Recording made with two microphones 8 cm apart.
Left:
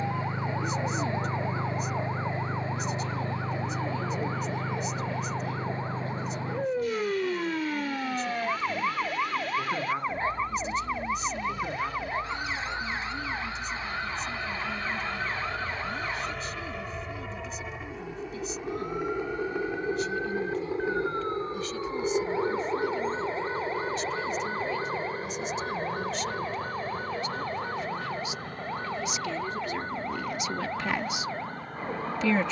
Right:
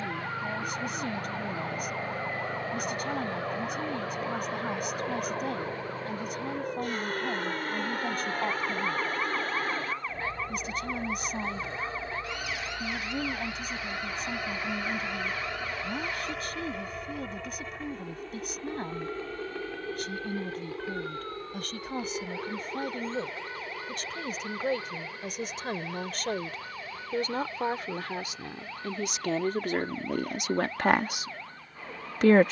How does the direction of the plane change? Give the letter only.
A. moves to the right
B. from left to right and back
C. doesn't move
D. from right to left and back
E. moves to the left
E.